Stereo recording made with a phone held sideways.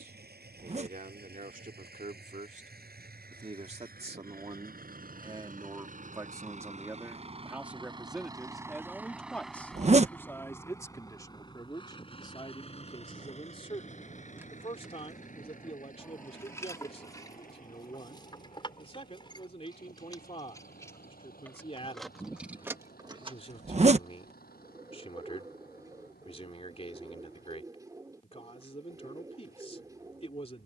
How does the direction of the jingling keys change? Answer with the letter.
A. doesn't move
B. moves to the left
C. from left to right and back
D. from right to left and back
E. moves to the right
D.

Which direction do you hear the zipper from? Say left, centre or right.
right.